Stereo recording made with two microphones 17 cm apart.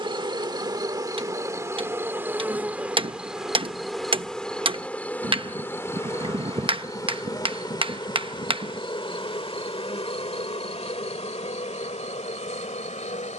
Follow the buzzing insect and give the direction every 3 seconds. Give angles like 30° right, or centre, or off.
20° right, centre, 20° left, 40° left, 40° left.